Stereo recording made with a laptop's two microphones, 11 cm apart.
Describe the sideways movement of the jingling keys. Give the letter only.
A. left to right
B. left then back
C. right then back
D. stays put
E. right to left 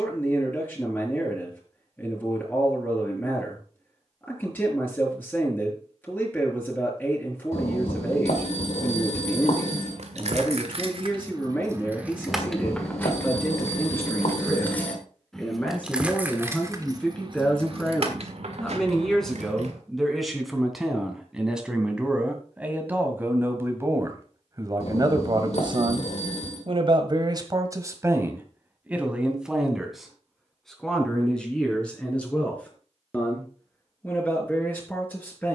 B.